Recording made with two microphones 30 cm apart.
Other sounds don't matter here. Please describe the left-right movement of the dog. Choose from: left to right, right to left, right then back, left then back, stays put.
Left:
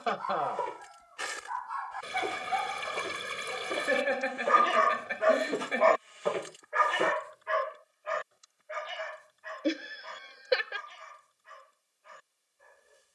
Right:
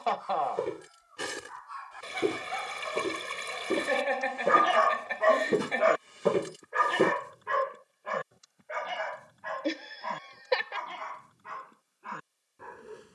left to right.